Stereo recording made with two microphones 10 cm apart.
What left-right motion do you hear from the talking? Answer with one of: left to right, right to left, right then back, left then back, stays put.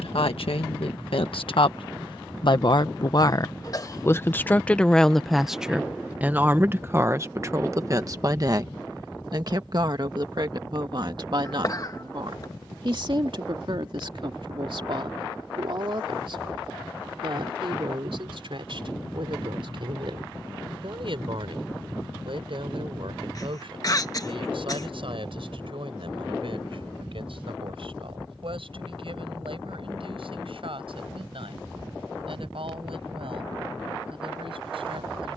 left to right.